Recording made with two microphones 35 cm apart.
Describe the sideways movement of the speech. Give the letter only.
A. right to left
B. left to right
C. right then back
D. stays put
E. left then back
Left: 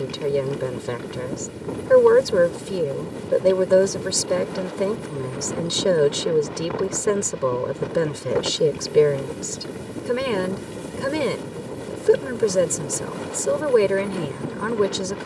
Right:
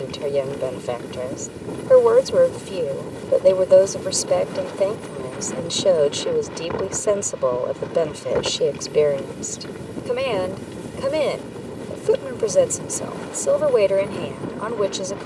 D.